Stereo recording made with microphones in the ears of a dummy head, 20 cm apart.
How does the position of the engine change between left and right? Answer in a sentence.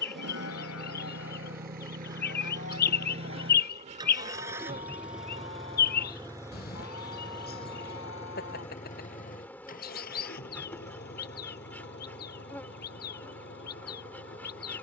You can hear the engine move to the left.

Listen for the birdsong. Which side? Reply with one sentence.
In this clip you hear the birdsong on the left.